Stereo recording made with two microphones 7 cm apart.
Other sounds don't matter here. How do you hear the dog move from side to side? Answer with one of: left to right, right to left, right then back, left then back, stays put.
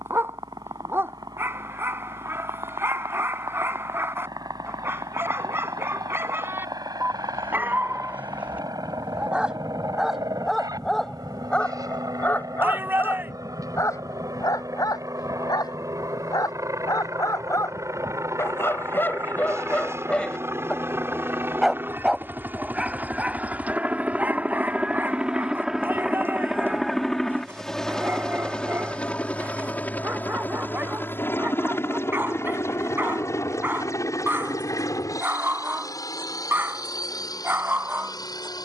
left then back.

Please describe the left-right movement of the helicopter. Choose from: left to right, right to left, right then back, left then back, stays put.
right to left.